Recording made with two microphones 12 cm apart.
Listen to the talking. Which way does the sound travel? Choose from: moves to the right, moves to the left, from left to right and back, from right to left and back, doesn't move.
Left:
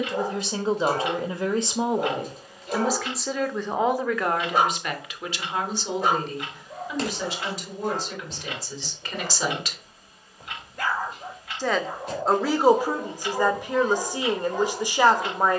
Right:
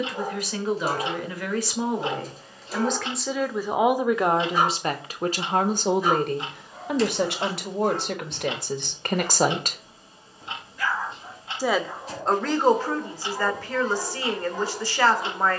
from left to right and back.